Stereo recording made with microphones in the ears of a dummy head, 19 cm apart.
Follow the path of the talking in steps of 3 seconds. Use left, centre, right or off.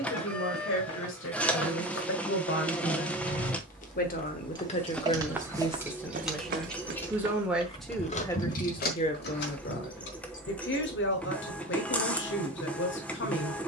left, left, centre, left, left.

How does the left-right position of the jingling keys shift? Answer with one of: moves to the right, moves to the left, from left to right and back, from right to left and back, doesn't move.
moves to the left.